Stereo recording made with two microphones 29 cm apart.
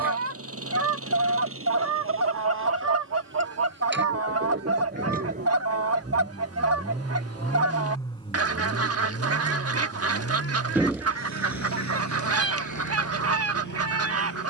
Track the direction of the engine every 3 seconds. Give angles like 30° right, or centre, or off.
50° right, 30° right, centre, 50° left, 80° left.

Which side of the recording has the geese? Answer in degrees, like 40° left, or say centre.
50° right.